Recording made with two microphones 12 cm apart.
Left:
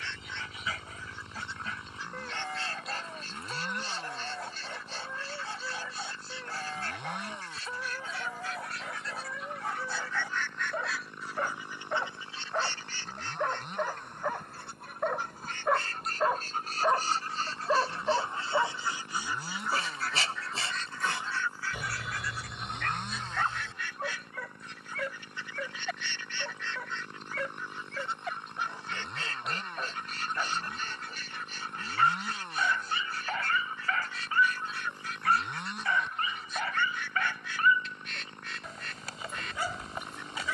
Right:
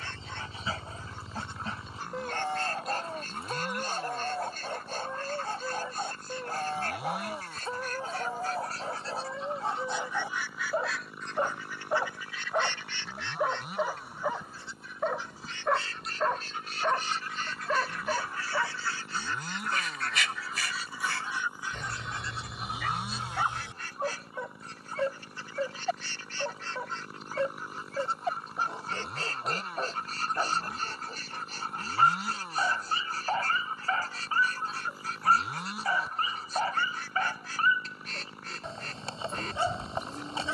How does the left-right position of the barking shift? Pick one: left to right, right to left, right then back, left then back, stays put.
left then back.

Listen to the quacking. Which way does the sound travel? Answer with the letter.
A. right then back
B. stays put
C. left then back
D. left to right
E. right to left
C.